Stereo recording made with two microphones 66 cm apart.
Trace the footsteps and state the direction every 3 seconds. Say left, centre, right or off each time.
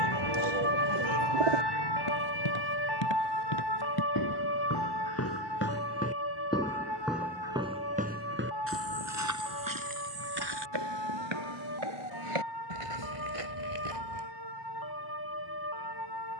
left, left, centre, right, right, off.